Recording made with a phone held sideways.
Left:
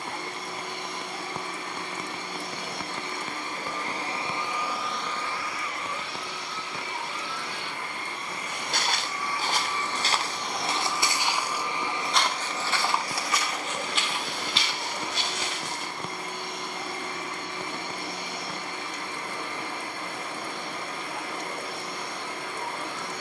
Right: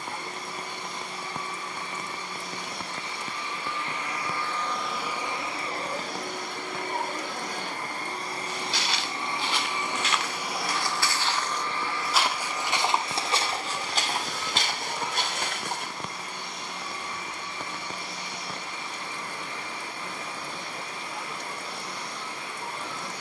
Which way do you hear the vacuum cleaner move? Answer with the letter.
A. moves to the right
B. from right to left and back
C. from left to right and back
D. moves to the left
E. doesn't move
C.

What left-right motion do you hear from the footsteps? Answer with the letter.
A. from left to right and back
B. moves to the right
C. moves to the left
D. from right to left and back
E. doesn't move
B.